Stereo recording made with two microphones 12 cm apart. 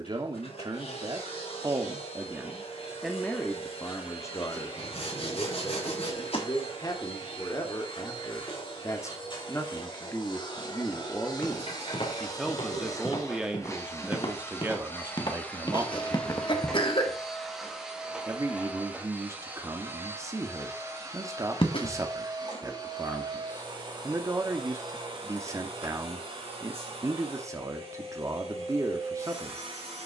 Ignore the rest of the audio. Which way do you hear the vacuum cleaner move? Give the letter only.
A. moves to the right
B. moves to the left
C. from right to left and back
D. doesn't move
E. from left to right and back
A.